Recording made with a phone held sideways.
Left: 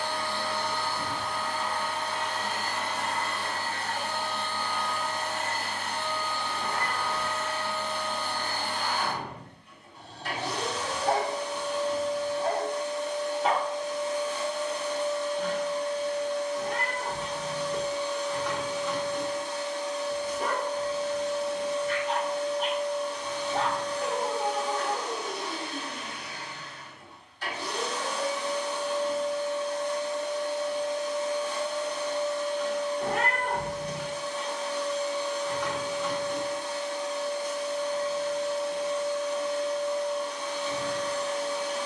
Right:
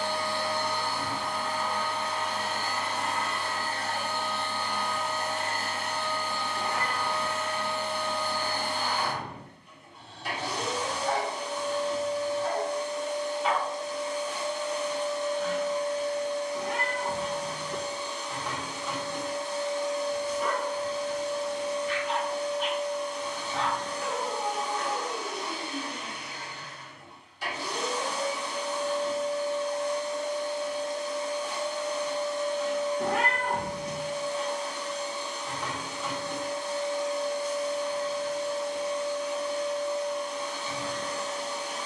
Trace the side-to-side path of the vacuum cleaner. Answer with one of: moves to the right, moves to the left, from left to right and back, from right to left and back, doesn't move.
doesn't move.